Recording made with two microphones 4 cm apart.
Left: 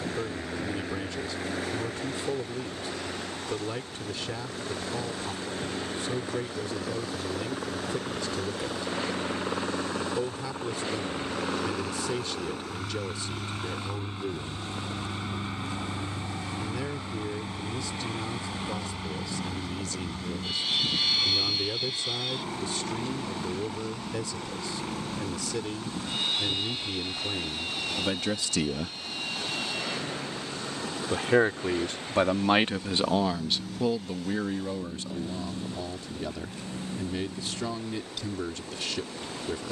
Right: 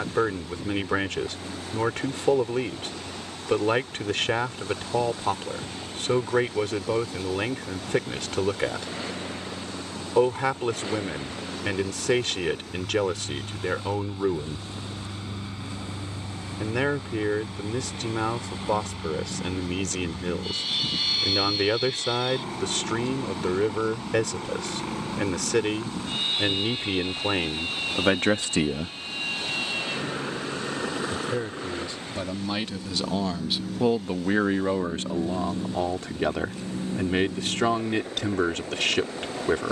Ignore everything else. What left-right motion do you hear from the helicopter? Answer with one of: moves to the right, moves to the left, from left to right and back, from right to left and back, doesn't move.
moves to the right.